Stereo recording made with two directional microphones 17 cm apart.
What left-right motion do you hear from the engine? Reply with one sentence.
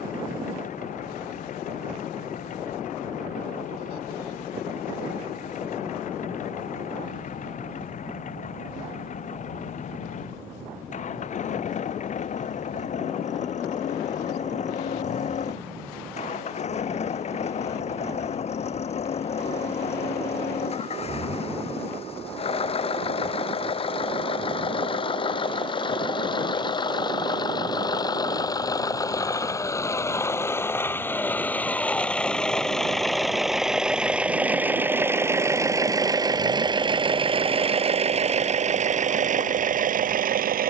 You can hear the engine move from left to right.